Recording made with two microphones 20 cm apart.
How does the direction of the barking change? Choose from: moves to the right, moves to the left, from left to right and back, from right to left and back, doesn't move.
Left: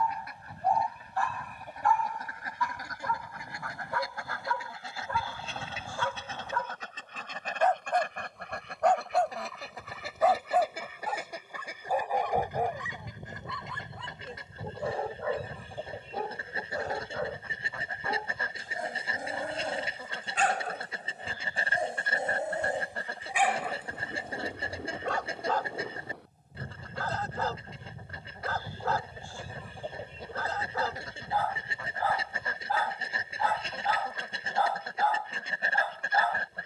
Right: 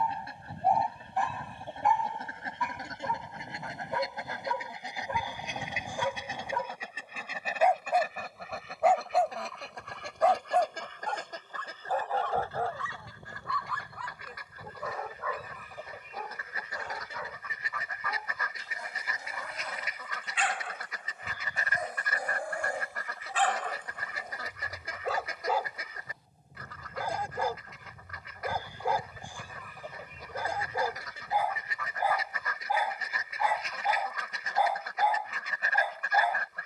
from right to left and back.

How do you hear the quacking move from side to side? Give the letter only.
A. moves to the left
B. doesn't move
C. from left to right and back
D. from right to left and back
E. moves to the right
A.